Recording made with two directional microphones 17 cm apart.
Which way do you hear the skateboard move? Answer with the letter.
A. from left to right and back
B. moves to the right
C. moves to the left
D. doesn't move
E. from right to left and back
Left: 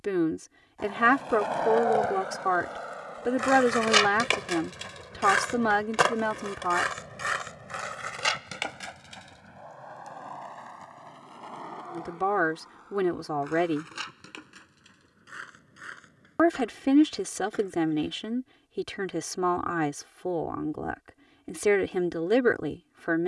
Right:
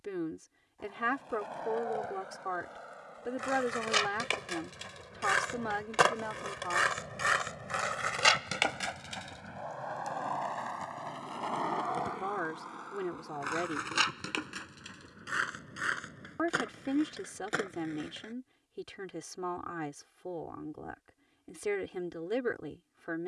B.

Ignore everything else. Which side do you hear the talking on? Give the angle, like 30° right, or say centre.
60° left.